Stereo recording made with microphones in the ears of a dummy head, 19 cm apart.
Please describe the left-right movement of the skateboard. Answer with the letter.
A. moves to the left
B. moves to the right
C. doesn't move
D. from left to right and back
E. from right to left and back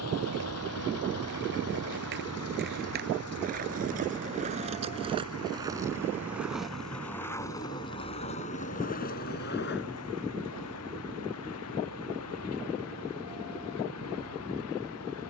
A.